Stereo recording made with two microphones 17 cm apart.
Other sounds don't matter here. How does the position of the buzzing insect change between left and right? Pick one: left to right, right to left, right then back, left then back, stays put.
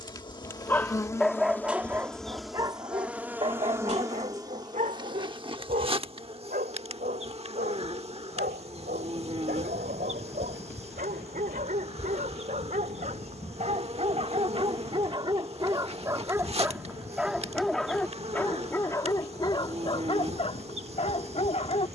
left to right.